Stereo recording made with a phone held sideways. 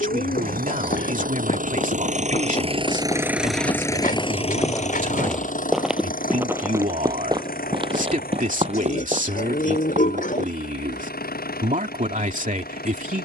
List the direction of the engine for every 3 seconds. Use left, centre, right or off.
right, left, left, left, left.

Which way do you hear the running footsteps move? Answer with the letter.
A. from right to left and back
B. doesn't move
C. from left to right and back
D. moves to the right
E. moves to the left
D.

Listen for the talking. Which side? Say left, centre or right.
right.